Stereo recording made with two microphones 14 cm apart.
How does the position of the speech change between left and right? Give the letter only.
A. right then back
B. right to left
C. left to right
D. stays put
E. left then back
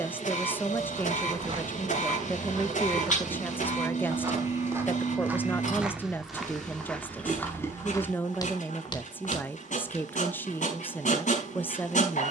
D.